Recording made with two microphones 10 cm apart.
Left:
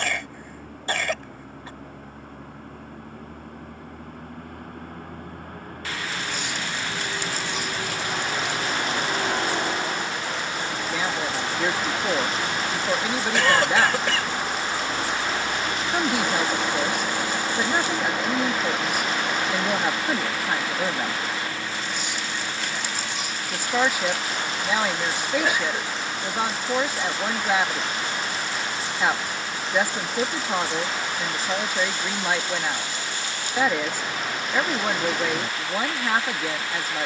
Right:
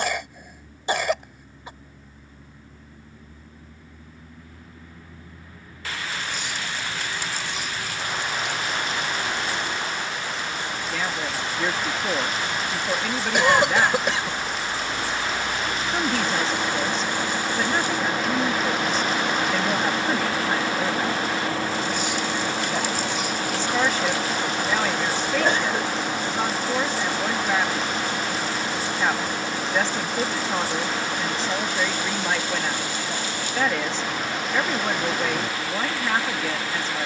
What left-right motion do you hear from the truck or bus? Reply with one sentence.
In this clip you hear the truck or bus travel towards the right.